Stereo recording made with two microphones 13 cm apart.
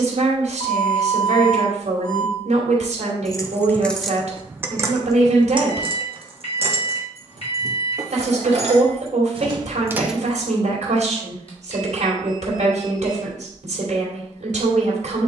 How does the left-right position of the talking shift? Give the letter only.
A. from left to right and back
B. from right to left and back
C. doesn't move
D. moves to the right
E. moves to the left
C.